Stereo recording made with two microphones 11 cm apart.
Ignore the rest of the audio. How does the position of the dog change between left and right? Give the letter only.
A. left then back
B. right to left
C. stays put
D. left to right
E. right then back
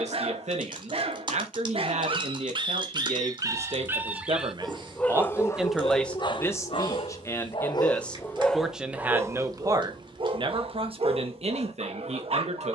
A.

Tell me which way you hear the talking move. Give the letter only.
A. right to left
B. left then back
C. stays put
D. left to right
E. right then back
B.